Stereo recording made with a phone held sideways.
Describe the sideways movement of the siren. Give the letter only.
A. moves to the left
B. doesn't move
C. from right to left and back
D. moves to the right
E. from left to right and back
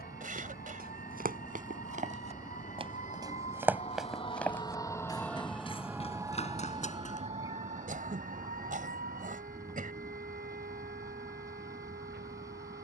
D.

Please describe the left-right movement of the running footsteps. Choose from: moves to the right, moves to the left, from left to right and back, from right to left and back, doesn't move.
moves to the left.